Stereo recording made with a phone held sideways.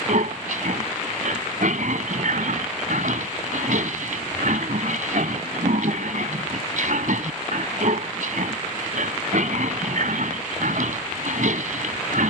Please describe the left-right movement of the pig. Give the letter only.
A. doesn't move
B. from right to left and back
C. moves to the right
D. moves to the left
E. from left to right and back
A.